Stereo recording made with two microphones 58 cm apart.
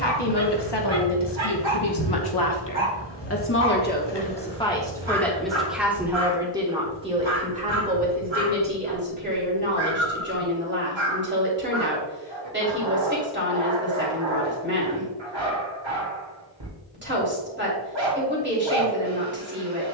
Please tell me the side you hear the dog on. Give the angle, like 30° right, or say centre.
50° right.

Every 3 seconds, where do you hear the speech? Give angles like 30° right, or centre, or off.
40° left, 10° left, 10° right, 20° right, 20° right, 20° right, 20° right.